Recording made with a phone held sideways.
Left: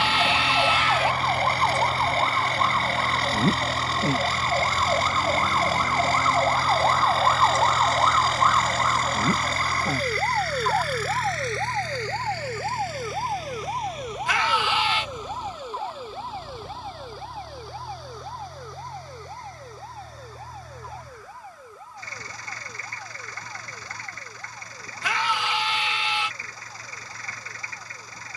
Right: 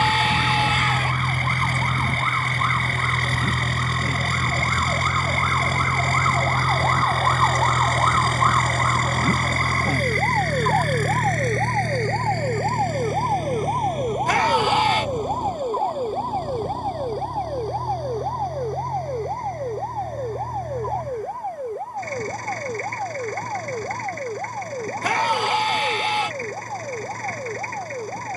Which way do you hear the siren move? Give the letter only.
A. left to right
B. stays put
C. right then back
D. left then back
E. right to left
A.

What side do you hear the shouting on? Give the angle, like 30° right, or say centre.
50° right.